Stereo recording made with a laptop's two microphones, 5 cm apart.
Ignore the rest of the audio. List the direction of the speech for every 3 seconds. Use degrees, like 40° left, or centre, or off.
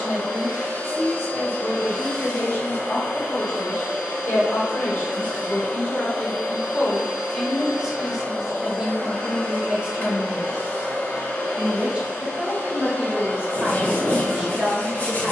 60° left, 50° left, centre, 20° right, 20° right.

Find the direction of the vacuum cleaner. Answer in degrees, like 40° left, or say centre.
40° left.